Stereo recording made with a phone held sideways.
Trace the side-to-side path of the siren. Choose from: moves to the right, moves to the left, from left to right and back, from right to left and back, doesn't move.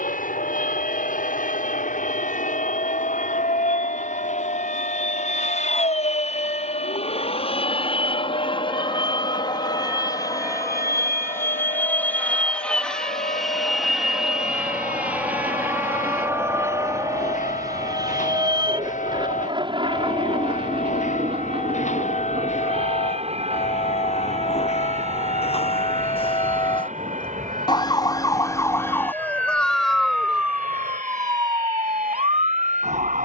moves to the right.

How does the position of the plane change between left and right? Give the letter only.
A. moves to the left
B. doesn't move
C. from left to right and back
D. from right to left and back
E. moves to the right
E.